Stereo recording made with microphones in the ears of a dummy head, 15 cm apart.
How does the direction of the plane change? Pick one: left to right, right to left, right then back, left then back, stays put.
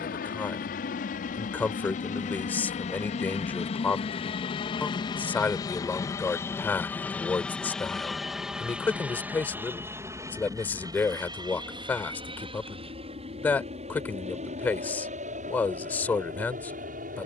left to right.